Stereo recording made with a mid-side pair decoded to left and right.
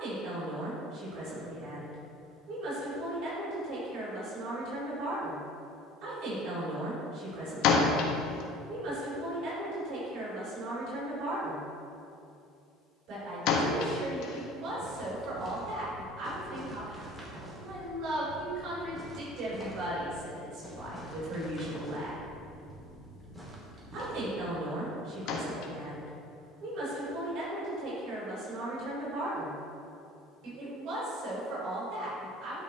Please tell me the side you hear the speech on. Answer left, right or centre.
right.